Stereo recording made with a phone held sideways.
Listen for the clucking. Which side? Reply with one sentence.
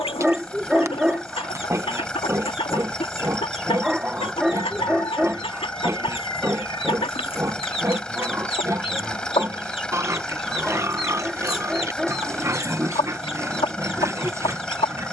You can hear the clucking on the left.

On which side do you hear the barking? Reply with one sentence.
You can hear the barking in the centre.